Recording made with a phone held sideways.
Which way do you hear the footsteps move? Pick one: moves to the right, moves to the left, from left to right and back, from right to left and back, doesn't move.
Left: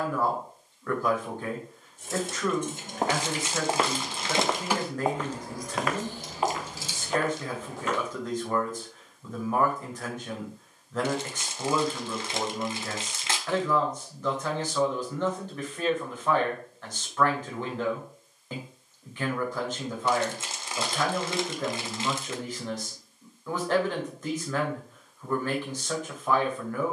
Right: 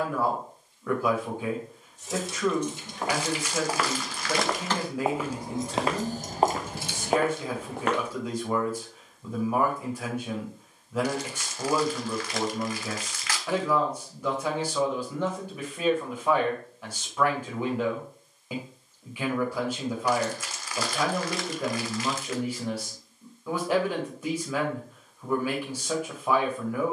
moves to the right.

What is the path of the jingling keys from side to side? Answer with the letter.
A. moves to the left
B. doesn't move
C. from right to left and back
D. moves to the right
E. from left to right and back
D.